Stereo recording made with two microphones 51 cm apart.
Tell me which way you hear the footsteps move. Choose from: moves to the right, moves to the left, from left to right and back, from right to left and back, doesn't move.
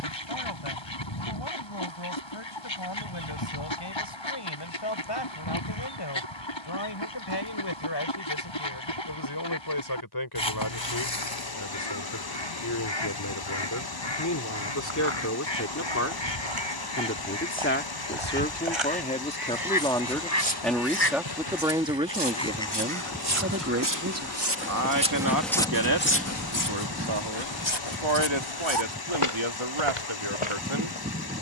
moves to the left.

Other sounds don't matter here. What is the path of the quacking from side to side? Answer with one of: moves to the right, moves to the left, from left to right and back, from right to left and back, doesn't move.
moves to the right.